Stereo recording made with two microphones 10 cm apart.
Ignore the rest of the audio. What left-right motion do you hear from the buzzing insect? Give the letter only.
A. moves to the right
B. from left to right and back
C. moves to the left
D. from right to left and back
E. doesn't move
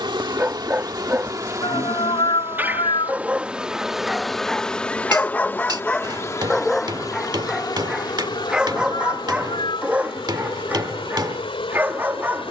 C.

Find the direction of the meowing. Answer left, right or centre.
left.